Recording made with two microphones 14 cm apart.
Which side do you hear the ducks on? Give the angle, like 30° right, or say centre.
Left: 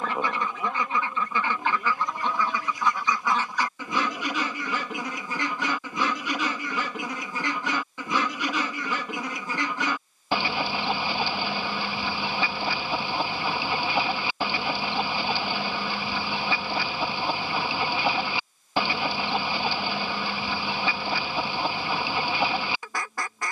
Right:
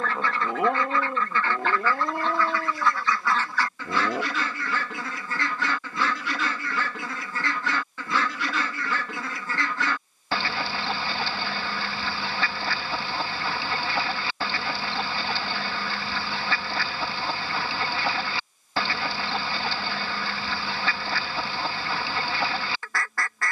20° left.